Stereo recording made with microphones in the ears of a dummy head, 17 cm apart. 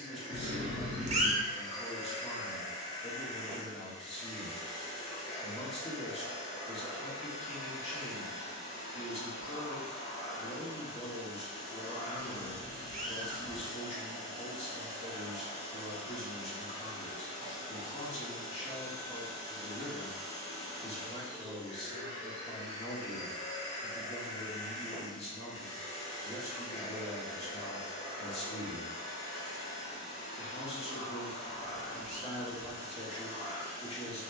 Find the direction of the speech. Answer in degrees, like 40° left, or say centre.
30° left.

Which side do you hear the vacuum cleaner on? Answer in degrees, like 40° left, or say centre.
30° left.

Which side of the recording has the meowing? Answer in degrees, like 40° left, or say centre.
40° right.